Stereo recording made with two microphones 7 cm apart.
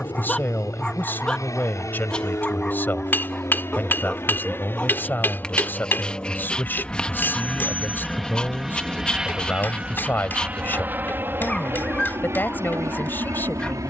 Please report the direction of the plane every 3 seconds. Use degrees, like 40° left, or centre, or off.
50° left, 30° left, 10° left, 20° right, 40° right.